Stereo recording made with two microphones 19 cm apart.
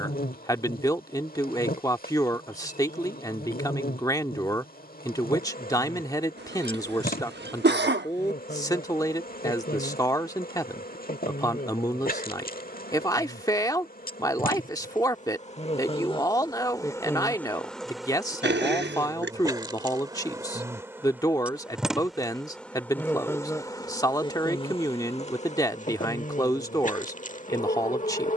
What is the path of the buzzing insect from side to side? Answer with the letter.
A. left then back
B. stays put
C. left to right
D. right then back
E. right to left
D.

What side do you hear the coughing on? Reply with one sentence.
You can hear the coughing on the right.